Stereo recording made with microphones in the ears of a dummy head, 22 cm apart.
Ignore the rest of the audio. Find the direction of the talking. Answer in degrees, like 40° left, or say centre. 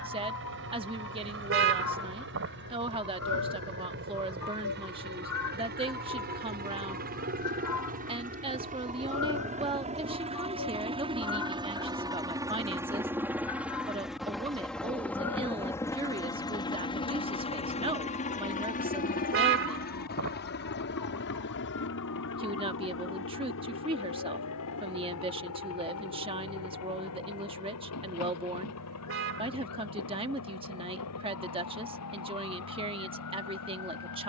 20° right.